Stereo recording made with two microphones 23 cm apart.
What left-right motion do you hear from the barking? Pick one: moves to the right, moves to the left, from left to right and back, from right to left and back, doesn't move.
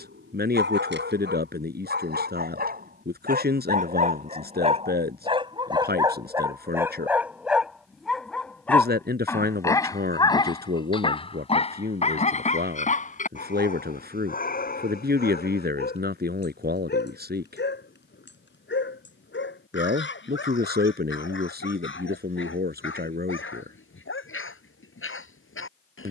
moves to the left.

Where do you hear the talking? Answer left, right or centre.
right.